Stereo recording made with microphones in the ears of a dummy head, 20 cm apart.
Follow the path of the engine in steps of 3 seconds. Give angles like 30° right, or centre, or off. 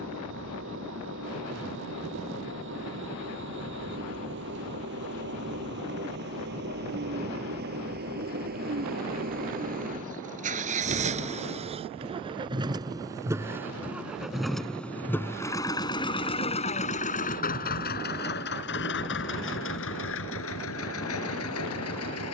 60° right, 50° right, 50° right, 30° right, 10° right, 30° left, 60° left, 70° left.